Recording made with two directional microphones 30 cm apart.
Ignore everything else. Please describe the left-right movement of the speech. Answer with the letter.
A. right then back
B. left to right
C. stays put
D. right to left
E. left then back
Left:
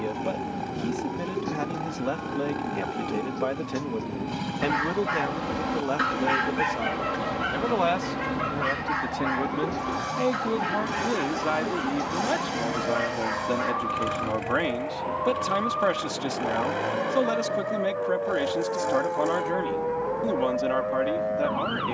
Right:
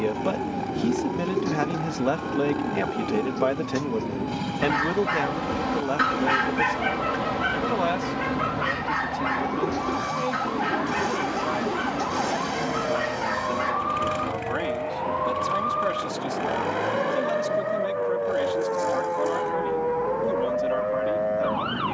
D.